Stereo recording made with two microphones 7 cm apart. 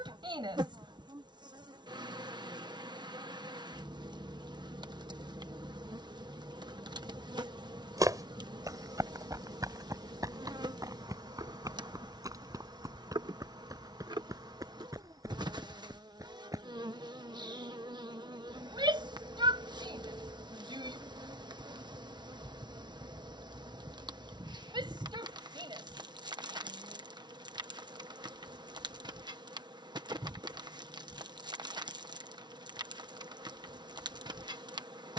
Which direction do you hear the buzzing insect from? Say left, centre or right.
right.